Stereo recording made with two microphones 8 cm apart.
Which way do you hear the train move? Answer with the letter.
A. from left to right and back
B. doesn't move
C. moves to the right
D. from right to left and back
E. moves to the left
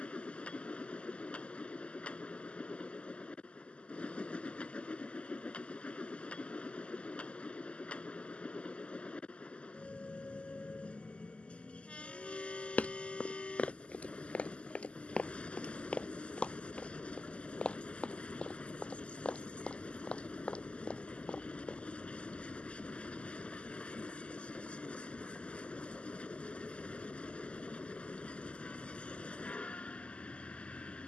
B.